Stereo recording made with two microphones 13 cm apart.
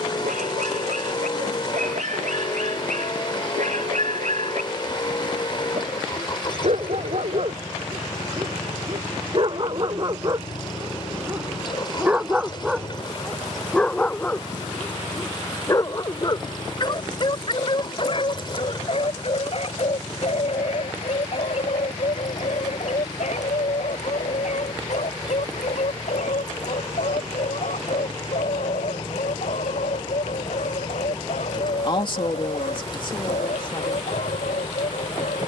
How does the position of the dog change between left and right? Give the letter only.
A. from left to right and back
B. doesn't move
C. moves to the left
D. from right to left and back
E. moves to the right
C.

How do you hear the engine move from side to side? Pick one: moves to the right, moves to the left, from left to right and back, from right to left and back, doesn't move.
doesn't move.